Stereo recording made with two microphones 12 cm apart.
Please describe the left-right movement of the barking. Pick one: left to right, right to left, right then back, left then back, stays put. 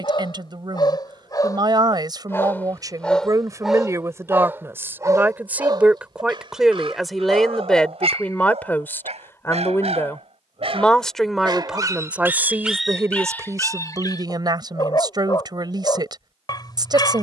right then back.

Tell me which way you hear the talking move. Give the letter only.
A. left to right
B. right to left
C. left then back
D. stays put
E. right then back
C.